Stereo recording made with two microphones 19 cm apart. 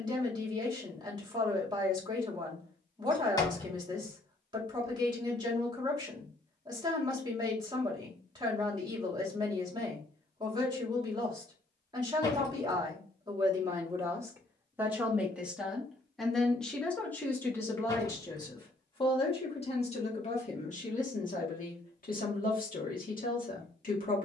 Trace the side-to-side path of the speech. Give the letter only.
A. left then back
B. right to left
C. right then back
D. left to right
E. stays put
B.